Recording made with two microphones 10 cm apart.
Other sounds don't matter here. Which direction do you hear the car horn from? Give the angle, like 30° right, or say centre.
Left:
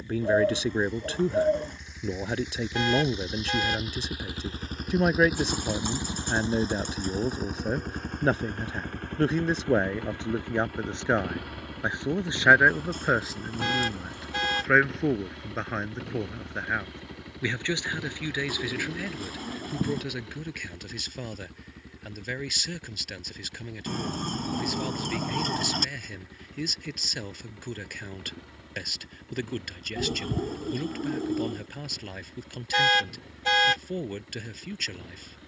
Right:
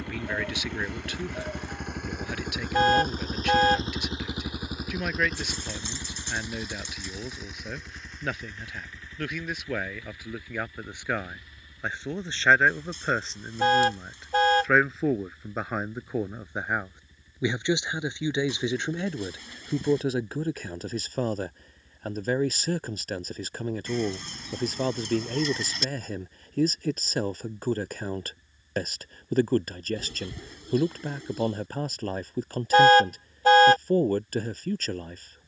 40° right.